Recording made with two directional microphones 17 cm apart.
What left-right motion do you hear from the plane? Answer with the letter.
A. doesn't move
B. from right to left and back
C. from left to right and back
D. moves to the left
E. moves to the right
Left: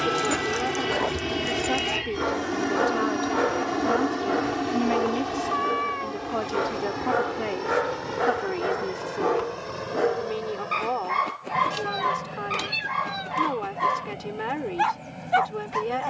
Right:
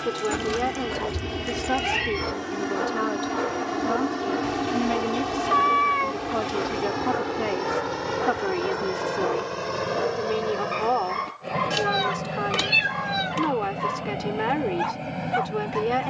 E.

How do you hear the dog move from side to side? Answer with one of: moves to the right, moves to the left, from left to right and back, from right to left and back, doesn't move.
doesn't move.